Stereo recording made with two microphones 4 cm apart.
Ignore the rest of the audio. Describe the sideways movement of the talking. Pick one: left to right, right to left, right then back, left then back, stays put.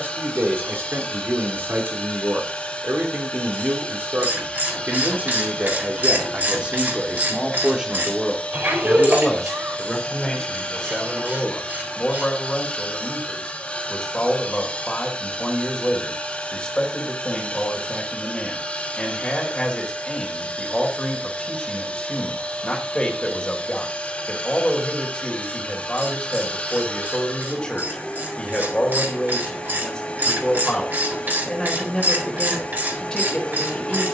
right to left.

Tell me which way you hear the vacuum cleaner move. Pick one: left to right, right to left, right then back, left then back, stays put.
stays put.